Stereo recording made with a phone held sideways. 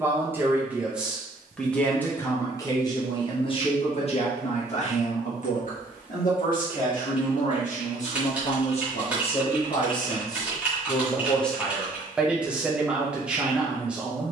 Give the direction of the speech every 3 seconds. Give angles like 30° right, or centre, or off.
10° left, 50° left, 50° left, 20° left, 10° right.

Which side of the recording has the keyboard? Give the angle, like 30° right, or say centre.
10° right.